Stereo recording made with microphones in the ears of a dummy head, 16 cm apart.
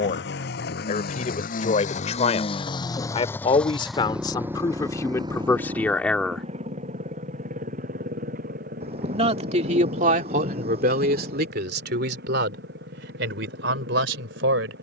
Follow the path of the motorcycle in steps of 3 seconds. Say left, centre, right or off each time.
left, centre, right, right, right.